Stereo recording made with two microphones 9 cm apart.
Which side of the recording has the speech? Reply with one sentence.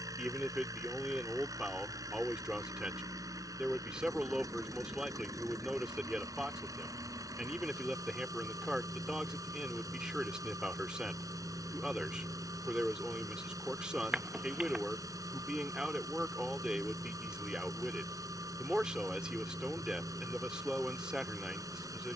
You can hear the speech in the centre.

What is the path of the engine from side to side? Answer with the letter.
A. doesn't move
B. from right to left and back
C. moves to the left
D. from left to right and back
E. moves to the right
A.